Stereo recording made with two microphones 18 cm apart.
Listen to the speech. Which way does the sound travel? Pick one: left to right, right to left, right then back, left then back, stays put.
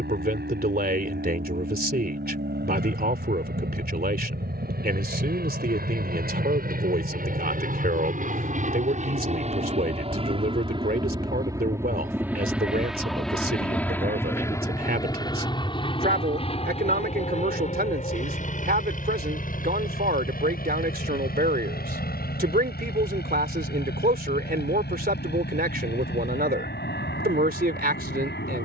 stays put.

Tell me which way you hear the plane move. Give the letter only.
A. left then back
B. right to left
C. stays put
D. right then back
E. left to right
B.